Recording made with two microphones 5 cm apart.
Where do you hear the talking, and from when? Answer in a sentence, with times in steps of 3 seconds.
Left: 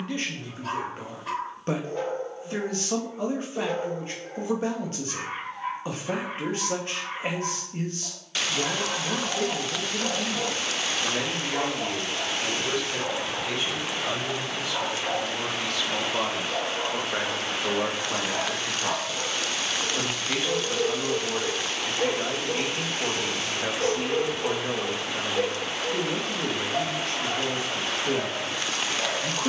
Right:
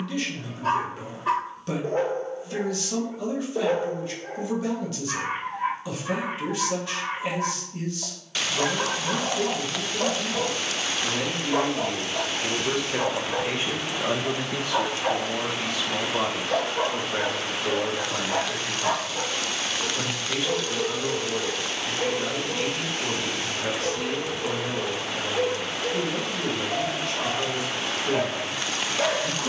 In this clip you hear the talking on the left from 0 s, on the right from 12 s, in the centre from 15 s and on the left from 18 s.